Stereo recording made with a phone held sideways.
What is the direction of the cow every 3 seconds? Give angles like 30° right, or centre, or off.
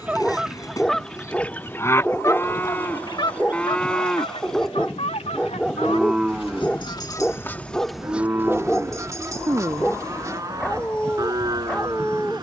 20° left, 10° left, 10° right, 20° right.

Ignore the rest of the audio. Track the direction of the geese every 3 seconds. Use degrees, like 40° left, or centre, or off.
10° left, 50° left, 10° left, 20° right.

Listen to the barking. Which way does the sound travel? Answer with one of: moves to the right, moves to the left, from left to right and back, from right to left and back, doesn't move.
doesn't move.